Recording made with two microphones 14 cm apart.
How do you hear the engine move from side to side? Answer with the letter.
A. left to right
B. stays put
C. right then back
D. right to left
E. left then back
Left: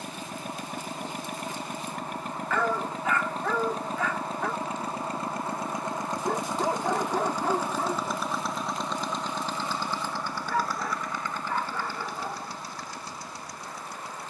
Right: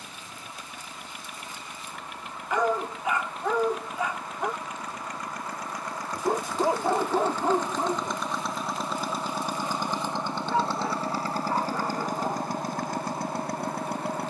A.